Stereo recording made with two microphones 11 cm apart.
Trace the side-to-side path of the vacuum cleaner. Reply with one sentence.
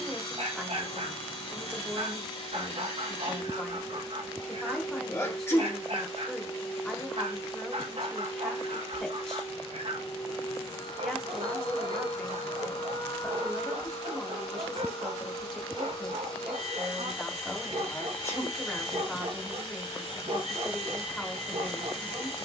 You can hear the vacuum cleaner stay in one place.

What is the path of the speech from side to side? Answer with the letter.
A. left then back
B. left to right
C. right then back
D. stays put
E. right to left
D.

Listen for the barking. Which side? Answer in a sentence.
In this clip you hear the barking on the right.